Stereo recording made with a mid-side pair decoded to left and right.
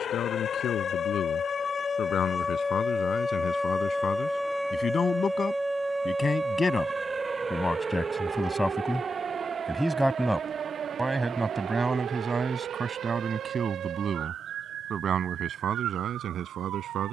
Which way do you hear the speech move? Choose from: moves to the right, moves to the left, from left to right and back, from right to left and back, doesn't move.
moves to the right.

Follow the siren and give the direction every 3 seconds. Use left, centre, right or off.
left, centre, right, right, right, right.